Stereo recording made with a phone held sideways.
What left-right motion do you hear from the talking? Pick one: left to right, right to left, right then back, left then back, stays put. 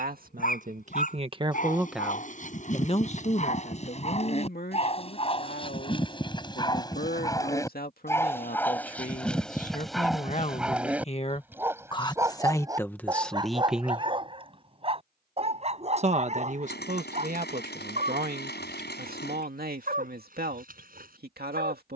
left then back.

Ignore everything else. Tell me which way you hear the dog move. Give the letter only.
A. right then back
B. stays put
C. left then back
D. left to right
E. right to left
D.